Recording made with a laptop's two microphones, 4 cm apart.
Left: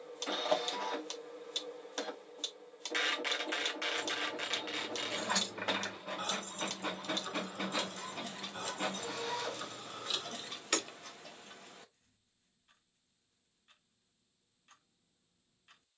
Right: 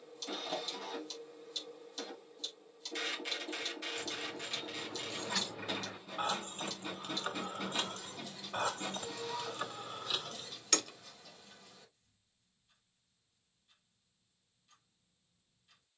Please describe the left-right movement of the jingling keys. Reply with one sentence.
You can hear the jingling keys move from left to right and back again.